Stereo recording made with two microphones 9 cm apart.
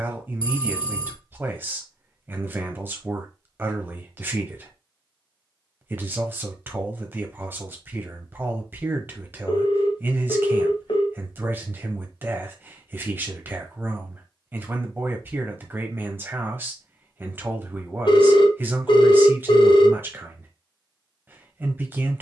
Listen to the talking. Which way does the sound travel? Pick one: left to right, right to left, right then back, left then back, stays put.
stays put.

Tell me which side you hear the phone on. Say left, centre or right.
left.